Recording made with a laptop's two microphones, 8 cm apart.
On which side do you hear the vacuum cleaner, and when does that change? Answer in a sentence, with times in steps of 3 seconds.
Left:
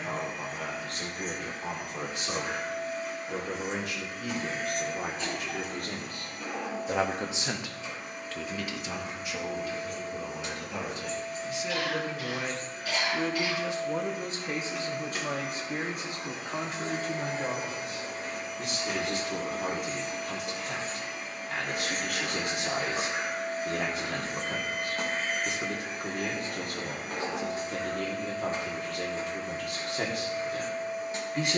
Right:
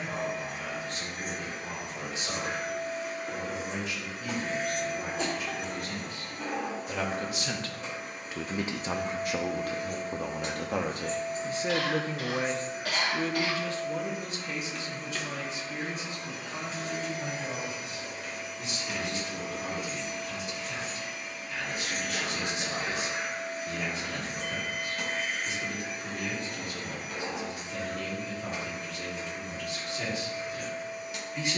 In this clip you hear the vacuum cleaner on the right from 0 s, in the centre from 12 s and on the left from 15 s.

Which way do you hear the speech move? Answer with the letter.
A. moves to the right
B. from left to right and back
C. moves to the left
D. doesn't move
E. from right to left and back
B.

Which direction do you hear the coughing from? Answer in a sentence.
You can hear the coughing on the right.